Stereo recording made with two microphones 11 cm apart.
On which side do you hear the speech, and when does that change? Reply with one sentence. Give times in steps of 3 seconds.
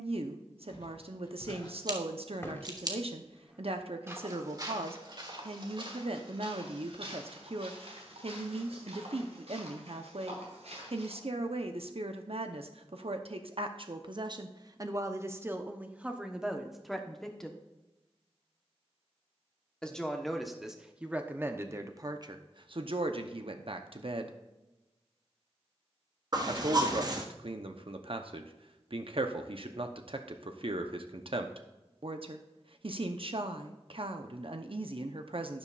You can hear the speech on the right from 0 s, in the centre from 15 s and on the right from 21 s.